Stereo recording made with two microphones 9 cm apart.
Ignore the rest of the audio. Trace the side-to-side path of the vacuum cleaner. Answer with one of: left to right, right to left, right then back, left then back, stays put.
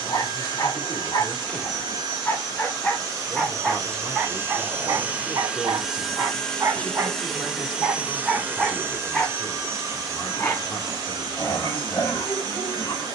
left then back.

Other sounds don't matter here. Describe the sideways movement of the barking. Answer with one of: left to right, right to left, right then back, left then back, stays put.
right then back.